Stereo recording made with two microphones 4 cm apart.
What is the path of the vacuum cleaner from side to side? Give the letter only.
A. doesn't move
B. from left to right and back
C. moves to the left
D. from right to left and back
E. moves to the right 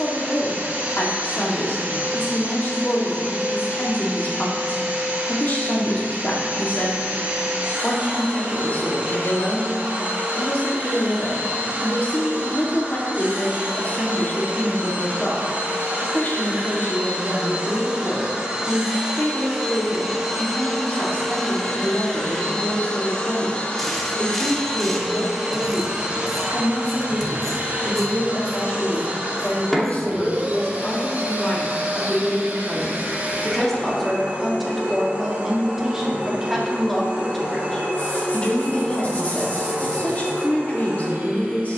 D.